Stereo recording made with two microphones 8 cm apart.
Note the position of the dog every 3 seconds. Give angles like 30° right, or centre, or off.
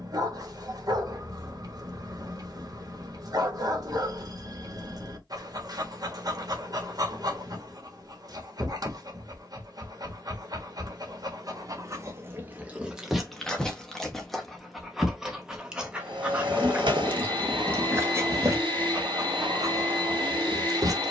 50° right, 50° right, 50° right, 50° right, centre, 20° right, 40° right.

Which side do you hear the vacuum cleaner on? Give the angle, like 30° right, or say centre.
80° right.